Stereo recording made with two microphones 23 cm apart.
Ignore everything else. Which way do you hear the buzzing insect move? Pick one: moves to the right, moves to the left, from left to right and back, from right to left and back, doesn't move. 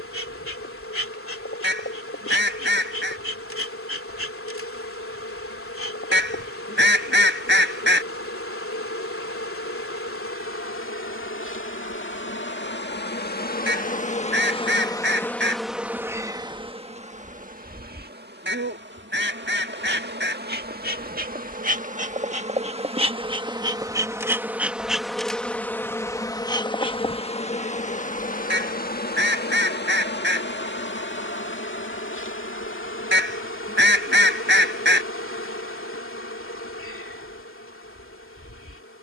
from left to right and back.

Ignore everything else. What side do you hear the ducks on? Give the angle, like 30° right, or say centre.
50° right.